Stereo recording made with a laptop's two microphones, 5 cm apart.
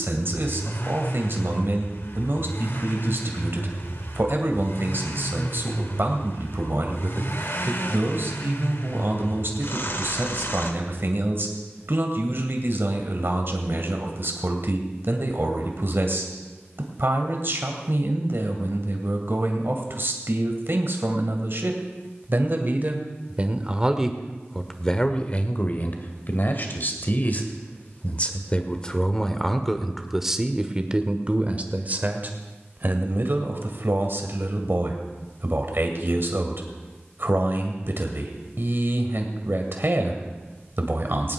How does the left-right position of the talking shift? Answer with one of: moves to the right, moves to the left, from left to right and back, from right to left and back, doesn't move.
from right to left and back.